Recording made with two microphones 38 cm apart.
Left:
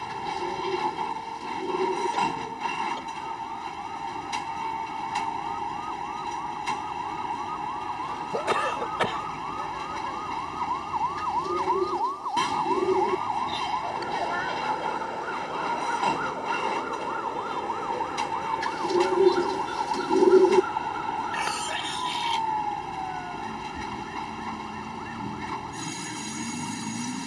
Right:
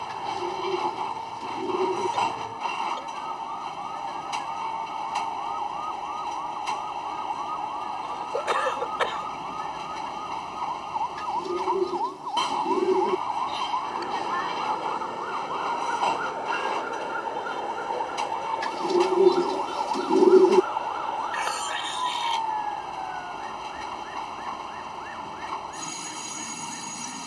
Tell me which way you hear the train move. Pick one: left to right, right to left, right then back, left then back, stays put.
stays put.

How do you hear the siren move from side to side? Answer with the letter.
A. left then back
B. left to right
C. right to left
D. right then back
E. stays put
C.